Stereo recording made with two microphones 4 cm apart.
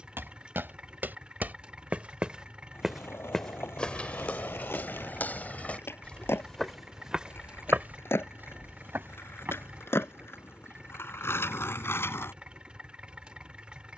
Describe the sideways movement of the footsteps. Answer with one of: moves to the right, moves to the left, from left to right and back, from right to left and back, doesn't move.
from right to left and back.